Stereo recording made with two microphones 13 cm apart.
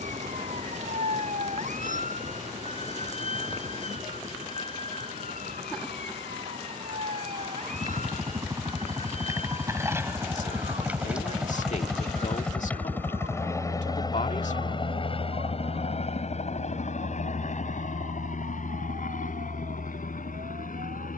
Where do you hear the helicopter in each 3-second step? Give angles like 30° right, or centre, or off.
50° right, 50° right, 30° right, 10° right, 20° left, 60° left, 70° left.